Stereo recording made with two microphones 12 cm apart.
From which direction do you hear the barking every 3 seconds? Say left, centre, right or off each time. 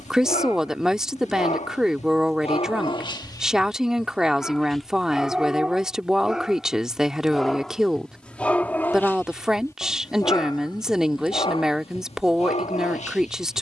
left, centre, centre, left, left.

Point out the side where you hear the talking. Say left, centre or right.
centre.